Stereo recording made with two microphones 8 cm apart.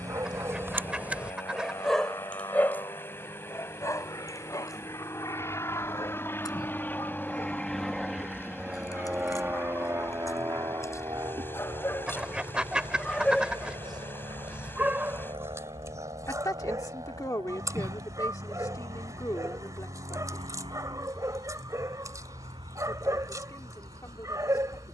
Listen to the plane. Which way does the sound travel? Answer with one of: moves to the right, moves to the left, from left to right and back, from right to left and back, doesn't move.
moves to the right.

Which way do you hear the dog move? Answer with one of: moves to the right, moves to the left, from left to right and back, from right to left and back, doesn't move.
from right to left and back.